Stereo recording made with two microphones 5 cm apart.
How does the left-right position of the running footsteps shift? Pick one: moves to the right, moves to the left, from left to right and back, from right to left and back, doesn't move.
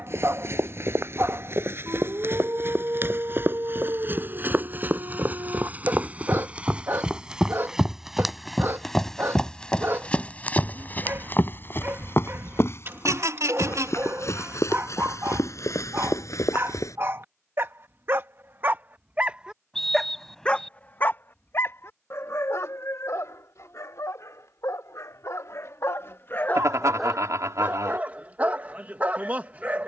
moves to the left.